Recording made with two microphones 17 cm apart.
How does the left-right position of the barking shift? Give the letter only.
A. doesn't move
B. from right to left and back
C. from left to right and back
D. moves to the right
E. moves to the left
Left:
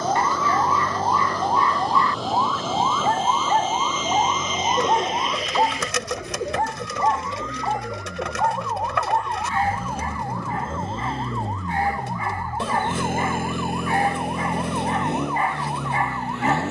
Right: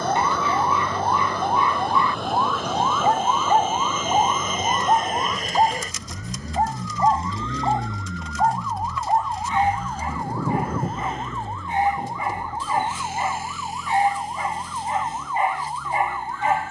A.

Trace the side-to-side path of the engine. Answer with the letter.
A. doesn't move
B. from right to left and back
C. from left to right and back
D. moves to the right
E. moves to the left
E.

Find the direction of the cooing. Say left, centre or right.
left.